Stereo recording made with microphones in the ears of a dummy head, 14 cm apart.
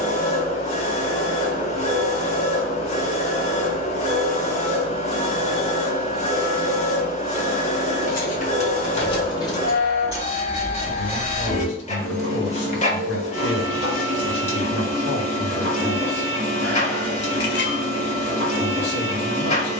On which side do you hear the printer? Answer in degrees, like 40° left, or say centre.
40° left.